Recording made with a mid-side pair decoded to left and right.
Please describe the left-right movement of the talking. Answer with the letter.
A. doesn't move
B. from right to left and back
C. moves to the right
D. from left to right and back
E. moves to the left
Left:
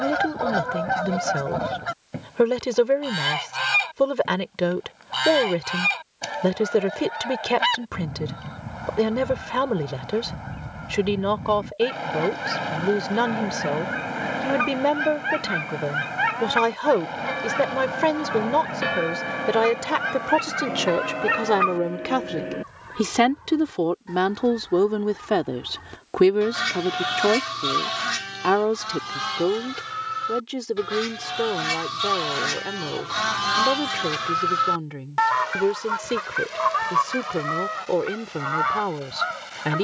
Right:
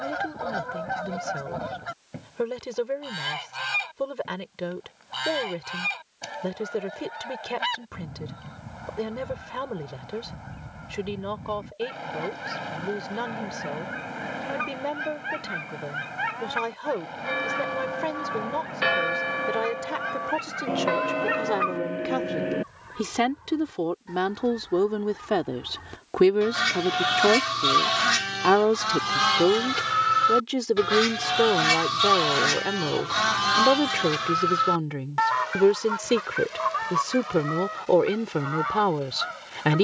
C.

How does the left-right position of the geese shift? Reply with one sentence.
In this clip you hear the geese move from left to right and back again.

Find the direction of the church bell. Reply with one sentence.
You can hear the church bell on the right.